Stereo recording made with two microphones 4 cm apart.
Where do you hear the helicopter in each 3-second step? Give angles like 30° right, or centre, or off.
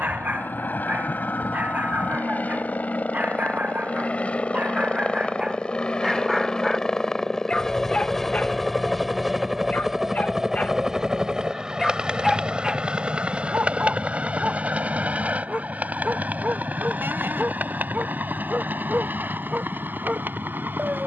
50° left, 30° left, 10° left, 10° right, 30° right, 40° right, 50° right.